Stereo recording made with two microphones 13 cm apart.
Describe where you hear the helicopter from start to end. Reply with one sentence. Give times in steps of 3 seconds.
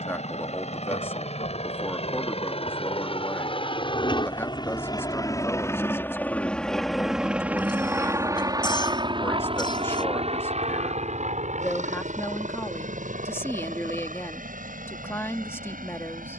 In this clip you hear the helicopter on the left from 0 s, in the centre from 6 s and on the right from 9 s.